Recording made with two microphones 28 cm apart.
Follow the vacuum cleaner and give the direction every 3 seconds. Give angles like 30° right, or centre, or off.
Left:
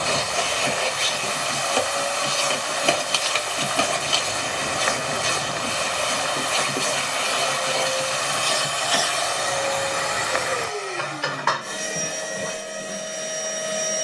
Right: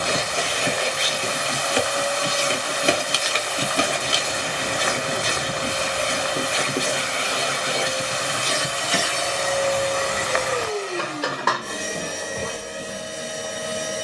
20° right, 20° right, 20° right, 40° right, 50° right.